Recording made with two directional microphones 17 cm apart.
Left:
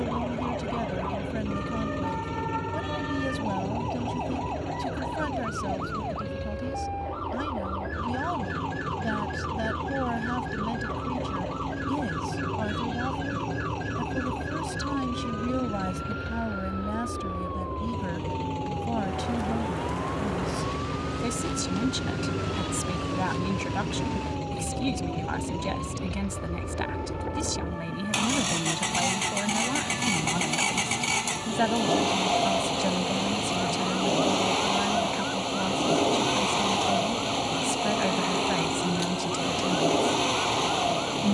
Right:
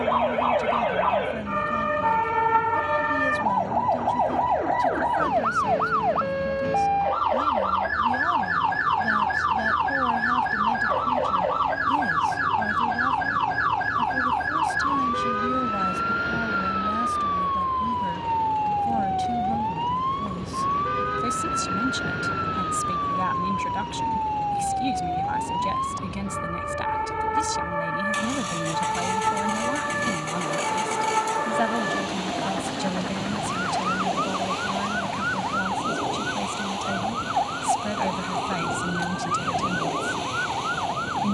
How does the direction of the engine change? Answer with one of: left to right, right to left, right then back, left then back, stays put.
stays put.